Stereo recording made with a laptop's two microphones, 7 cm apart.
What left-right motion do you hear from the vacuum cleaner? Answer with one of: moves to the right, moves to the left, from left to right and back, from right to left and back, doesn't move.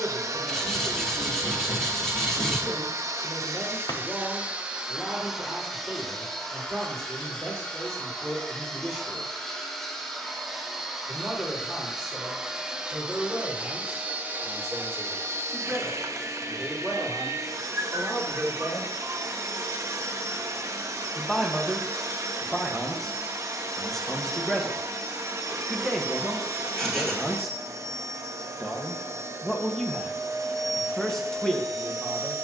from right to left and back.